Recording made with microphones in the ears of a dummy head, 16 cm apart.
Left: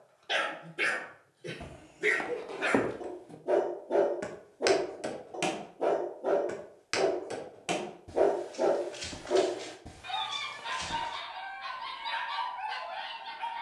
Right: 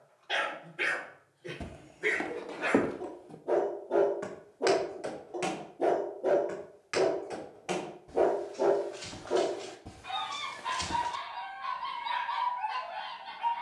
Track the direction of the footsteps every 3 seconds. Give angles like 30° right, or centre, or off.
10° right, 30° left, 40° left, centre, off.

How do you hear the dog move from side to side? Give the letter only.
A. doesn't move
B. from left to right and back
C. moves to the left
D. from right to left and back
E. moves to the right
B.